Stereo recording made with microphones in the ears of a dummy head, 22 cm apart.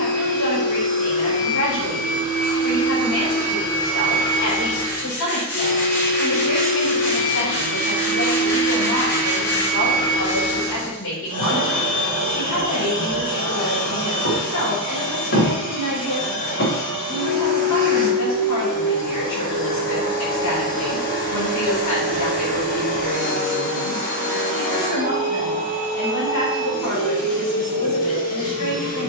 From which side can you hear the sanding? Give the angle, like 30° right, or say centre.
40° left.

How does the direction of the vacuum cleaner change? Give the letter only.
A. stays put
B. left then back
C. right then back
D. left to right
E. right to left
A.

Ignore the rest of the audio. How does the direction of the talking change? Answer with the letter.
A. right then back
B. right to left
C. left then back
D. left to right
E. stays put
E.